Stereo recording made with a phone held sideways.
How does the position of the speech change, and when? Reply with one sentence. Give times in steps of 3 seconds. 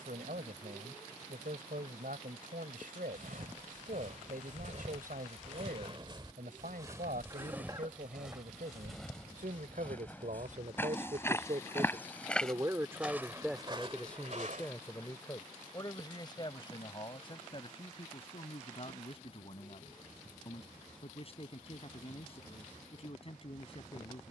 You can hear the speech on the right from 0 s, in the centre from 12 s and on the left from 15 s.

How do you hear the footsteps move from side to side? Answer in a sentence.
In this clip you hear the footsteps go left and come back.